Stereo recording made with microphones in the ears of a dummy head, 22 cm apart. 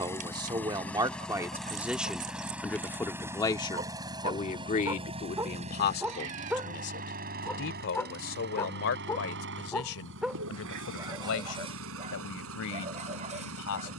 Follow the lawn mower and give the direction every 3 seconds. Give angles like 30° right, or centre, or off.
centre, 20° right, 40° right, 60° right, 70° right.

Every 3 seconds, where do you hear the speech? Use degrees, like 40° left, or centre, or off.
10° right, 30° left, 60° left, 70° left, 70° left.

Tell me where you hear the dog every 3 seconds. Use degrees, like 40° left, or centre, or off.
40° right, 20° right, centre, 10° right, 30° right.